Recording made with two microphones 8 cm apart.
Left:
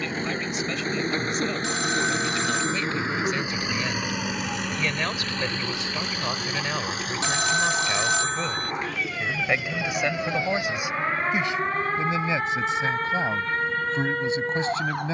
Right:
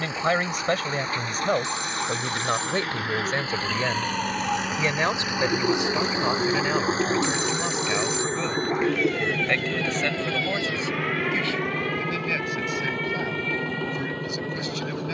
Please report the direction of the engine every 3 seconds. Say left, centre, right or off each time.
left, centre, right, right, right.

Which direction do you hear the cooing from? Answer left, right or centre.
right.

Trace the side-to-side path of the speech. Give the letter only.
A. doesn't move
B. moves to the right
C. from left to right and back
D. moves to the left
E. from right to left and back
D.